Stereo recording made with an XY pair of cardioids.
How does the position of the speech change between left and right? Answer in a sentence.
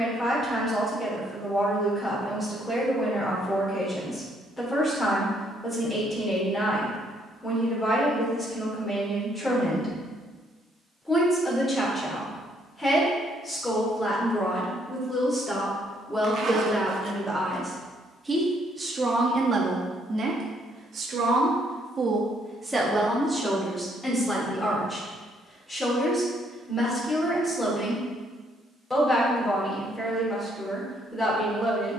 You can hear the speech go right and come back.